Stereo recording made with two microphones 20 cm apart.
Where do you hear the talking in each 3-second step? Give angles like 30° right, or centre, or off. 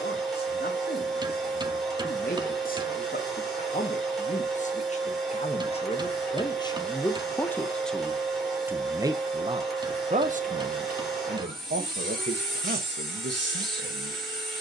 50° left, 40° left, 10° left, 40° right, 70° right.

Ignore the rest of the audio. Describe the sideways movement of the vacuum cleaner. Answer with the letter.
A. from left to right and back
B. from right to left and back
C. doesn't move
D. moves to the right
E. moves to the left
C.